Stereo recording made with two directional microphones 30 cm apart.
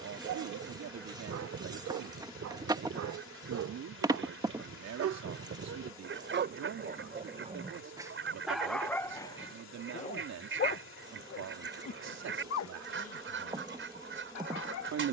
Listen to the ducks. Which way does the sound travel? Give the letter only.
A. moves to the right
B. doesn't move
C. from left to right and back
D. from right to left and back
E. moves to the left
B.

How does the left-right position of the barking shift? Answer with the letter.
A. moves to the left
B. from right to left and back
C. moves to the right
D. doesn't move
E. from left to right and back
A.